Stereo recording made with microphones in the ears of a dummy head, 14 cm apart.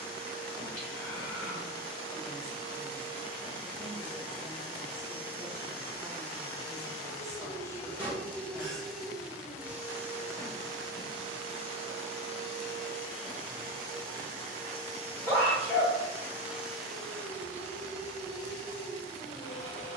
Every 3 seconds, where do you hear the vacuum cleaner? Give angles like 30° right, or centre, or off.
30° left, 30° left, 20° left, 20° right, 50° right, 10° right, 30° left.